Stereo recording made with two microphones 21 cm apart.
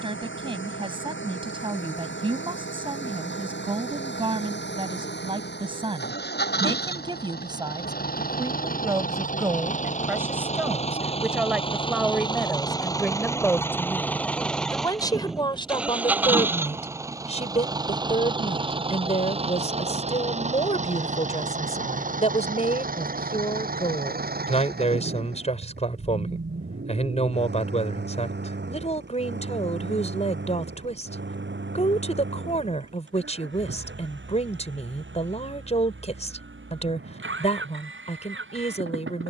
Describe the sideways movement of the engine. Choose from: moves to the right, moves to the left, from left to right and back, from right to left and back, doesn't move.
moves to the right.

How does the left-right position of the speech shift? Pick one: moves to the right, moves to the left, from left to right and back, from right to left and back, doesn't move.
moves to the left.